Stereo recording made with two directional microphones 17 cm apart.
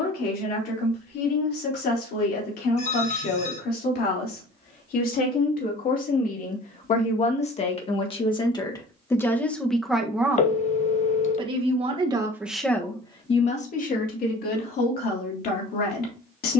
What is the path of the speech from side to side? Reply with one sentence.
You can hear the speech go right and come back.